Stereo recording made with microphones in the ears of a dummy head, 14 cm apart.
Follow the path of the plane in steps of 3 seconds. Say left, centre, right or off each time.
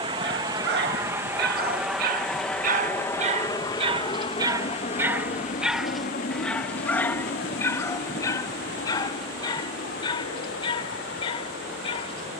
centre, left, left, left.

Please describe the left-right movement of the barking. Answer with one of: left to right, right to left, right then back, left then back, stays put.
right to left.